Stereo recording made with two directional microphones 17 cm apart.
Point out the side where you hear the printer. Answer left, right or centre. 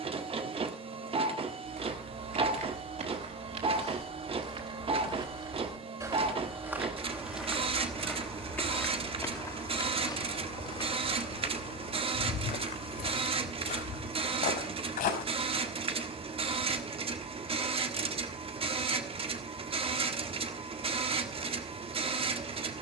right.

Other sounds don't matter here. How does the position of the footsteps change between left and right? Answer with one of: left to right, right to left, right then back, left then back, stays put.
right to left.